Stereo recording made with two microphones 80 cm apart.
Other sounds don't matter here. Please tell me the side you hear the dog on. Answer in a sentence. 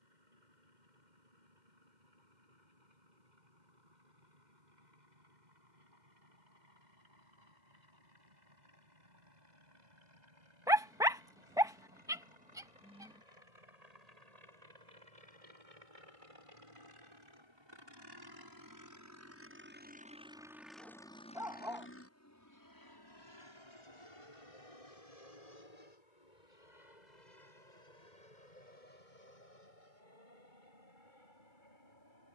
In this clip you hear the dog in the centre.